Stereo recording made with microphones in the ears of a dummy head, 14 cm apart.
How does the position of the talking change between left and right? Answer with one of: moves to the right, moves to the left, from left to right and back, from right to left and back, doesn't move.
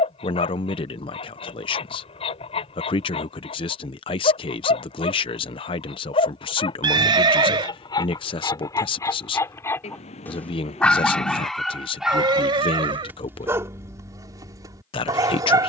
doesn't move.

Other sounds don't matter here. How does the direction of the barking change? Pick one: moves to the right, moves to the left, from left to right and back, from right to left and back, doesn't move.
moves to the right.